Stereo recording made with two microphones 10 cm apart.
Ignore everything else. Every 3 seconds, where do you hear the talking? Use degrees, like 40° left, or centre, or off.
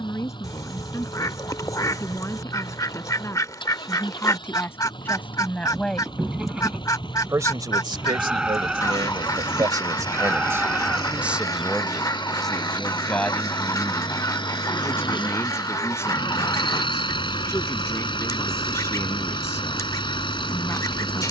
30° left, 20° left, 40° right, 30° right, 20° left, 30° left, 30° left.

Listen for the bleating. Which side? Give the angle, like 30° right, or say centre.
10° right.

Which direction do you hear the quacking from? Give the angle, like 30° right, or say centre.
40° left.